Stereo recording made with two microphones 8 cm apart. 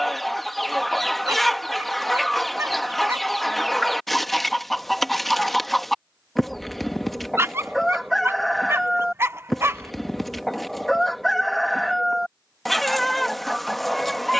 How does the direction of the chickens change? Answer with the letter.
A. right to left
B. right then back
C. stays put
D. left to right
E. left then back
C.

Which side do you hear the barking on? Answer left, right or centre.
right.